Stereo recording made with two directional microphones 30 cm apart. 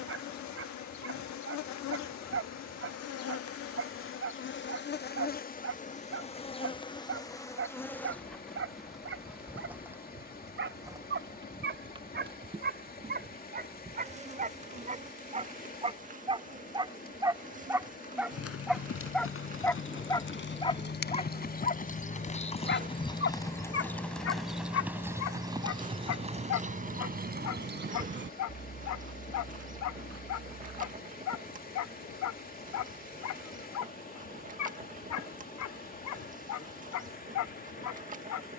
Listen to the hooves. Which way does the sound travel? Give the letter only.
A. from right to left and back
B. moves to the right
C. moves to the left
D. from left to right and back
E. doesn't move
B.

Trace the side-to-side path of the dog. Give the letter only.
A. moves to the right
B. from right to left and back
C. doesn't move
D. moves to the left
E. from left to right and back
D.